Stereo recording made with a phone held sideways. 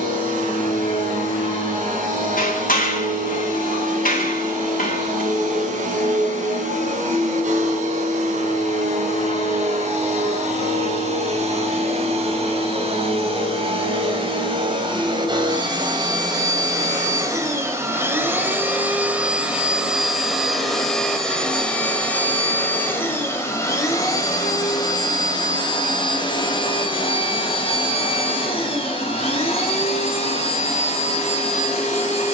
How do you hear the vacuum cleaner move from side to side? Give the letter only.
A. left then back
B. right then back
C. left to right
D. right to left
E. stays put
D.